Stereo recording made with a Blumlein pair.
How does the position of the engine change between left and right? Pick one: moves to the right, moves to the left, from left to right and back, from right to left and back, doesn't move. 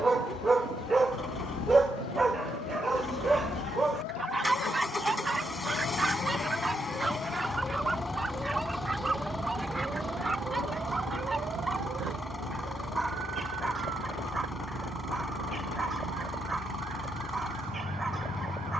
doesn't move.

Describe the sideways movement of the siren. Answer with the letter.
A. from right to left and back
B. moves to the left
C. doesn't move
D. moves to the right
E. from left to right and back
D.